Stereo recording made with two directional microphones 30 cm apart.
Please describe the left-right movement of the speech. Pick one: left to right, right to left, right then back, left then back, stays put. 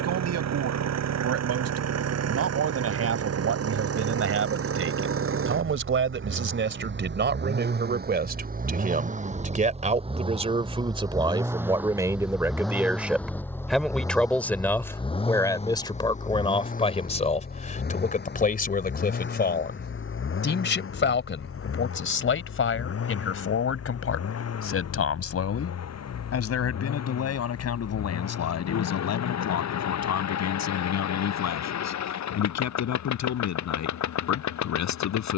right to left.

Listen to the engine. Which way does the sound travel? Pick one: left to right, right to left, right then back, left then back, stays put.
right to left.